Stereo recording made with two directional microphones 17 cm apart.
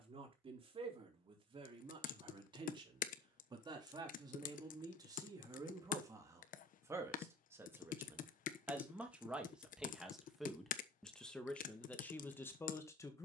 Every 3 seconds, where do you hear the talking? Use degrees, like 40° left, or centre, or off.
30° right, 20° right, 10° right, centre, 10° left.